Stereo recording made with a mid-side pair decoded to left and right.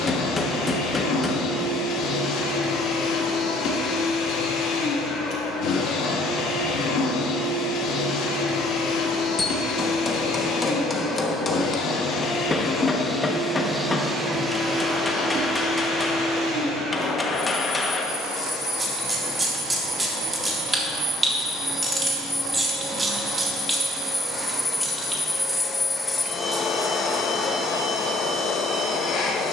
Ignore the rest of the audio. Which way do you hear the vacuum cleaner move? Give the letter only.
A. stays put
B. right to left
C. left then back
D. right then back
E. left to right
D.